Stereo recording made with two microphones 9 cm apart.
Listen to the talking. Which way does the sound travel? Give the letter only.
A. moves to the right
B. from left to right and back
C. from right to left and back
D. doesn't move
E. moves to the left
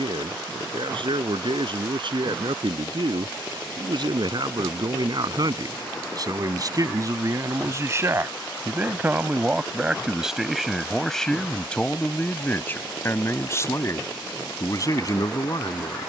E.